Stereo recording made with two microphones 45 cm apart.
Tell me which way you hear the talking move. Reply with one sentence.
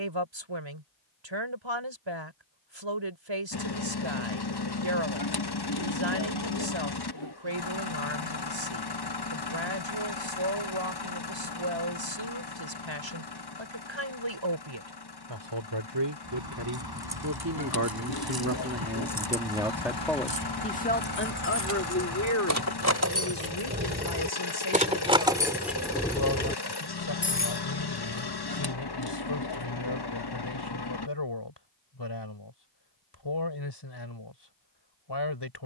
In this clip you hear the talking move to the left.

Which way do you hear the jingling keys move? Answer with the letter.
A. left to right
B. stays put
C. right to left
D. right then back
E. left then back
C.